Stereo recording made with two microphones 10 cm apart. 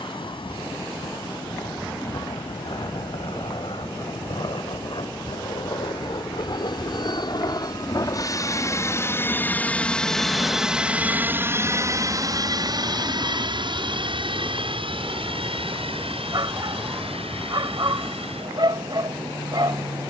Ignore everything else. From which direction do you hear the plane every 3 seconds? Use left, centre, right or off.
left, left, left, centre, right, right, right.